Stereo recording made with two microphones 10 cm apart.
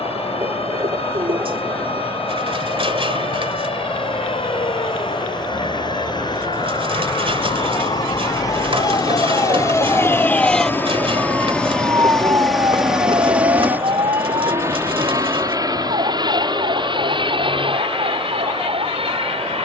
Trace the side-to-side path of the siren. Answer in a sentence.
You can hear the siren move from left to right.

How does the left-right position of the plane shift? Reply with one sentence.
You can hear the plane go from the left side to the right.